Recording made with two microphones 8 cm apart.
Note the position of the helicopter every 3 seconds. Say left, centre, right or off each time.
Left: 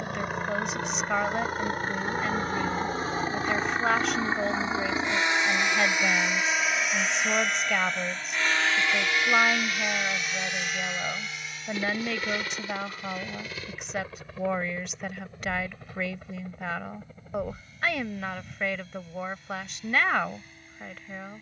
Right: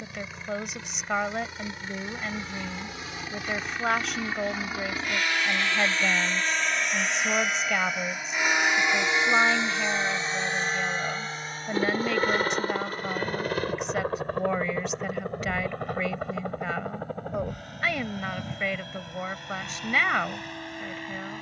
left, left, centre, right, right, right, right.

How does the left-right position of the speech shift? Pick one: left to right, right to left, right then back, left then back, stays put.
stays put.